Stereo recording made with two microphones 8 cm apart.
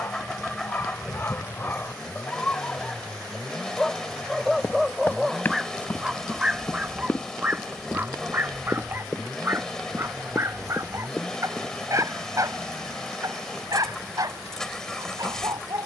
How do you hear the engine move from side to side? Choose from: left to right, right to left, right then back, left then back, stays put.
stays put.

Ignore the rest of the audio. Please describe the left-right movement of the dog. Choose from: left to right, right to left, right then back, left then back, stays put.
left to right.